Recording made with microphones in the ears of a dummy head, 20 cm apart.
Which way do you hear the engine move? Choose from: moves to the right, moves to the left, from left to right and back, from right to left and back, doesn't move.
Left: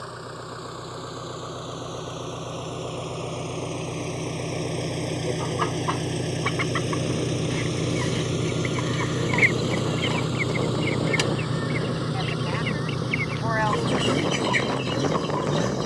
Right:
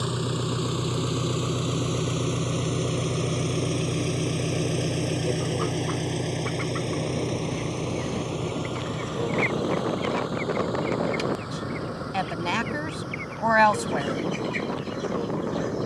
moves to the left.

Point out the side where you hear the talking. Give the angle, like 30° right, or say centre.
70° right.